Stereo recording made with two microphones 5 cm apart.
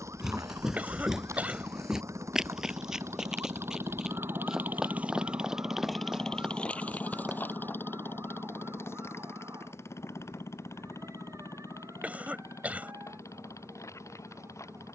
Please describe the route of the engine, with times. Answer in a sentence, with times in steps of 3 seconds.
You can hear the engine on the right from 0 s and on the left from 6 s.